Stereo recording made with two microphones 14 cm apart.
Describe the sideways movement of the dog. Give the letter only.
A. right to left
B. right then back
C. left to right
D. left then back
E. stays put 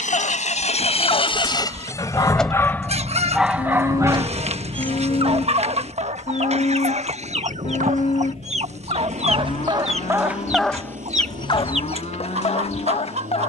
B.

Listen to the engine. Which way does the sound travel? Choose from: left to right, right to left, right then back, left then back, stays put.
left to right.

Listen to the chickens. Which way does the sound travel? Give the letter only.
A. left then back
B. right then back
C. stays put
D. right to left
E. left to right
C.